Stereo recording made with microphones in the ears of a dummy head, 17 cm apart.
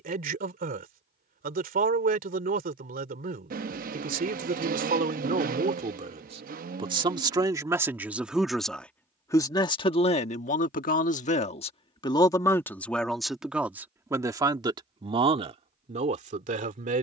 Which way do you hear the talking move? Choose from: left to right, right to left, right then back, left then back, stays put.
left then back.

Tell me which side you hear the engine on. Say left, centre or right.
right.